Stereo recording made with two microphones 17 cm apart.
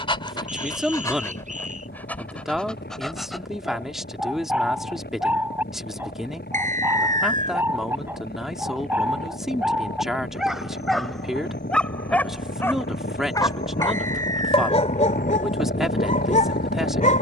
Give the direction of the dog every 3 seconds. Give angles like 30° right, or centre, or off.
20° left, 10° right, 10° right, centre, 20° left, 50° left.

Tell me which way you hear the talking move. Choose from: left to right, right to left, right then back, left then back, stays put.
stays put.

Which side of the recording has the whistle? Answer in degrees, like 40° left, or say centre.
50° right.